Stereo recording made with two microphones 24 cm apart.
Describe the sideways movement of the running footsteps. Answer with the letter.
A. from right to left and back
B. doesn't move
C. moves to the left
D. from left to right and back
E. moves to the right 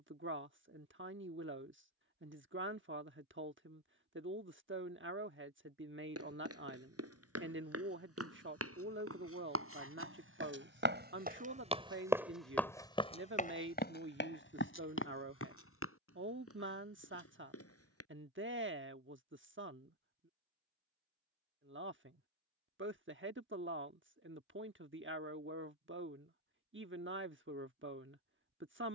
C.